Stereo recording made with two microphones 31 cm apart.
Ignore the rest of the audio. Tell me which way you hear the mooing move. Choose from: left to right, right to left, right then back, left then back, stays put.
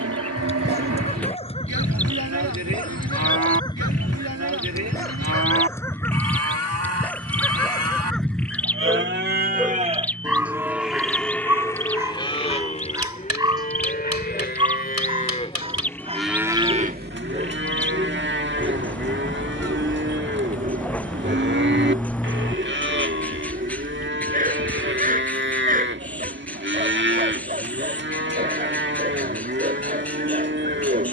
left then back.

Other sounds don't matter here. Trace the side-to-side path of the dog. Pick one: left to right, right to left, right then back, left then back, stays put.
left to right.